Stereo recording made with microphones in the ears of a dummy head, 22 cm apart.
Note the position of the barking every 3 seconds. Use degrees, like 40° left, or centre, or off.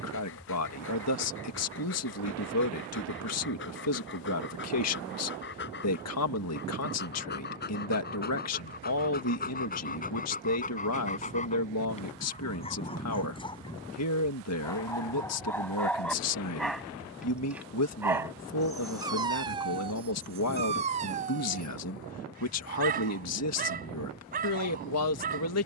50° left, 50° left, 40° left, 30° left, 20° left, centre, 20° right, 40° right, 40° right.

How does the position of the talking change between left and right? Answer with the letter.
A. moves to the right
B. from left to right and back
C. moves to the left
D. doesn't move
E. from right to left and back
D.